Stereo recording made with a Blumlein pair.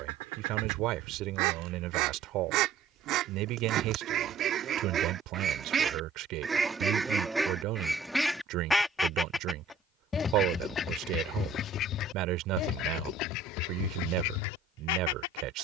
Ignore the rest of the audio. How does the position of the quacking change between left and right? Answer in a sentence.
You can hear the quacking travel towards the left.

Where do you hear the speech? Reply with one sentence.
You can hear the speech on the right.